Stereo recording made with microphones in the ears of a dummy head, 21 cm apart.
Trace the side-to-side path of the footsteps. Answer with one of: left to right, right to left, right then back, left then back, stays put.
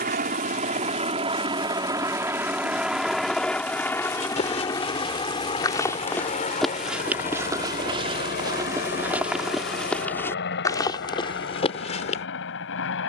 right then back.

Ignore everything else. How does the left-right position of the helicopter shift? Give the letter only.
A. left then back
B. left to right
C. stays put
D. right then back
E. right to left
E.